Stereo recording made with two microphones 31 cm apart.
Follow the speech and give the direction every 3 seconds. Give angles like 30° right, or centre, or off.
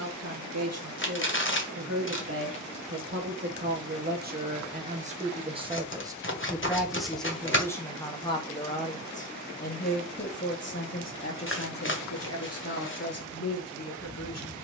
50° right, 30° right, 10° left, 40° left, 50° left.